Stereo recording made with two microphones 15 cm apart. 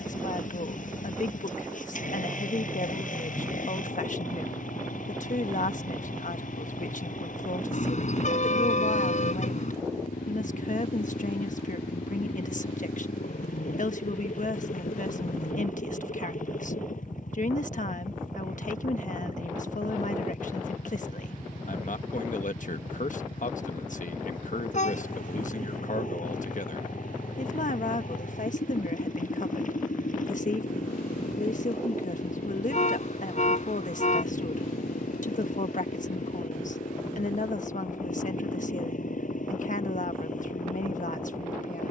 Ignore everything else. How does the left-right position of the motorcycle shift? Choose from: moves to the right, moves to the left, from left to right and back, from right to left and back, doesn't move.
doesn't move.